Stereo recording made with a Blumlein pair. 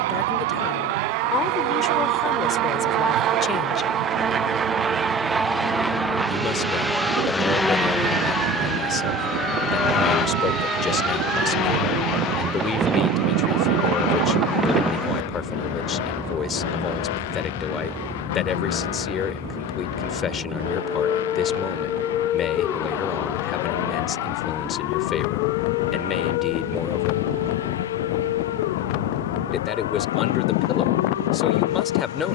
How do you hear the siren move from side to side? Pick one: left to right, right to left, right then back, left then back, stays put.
right to left.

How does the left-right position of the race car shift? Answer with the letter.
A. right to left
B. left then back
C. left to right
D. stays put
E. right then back
A.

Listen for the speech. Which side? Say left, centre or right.
left.